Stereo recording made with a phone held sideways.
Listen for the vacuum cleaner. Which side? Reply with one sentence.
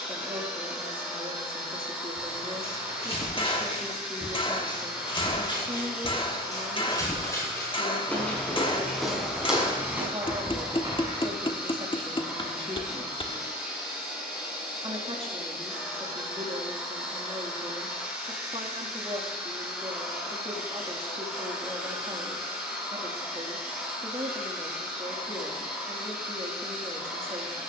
In this clip you hear the vacuum cleaner in the centre.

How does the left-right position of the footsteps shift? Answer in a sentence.
You can hear the footsteps travel towards the right.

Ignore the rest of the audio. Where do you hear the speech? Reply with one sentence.
In this clip you hear the speech on the right.